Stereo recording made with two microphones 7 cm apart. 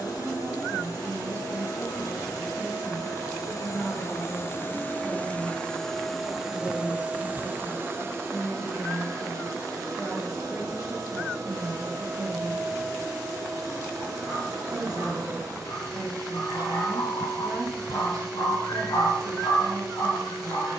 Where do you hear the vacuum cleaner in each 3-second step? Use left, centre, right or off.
left, left, right, right, right, right, right.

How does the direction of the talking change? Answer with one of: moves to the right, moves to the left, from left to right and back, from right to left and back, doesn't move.
from right to left and back.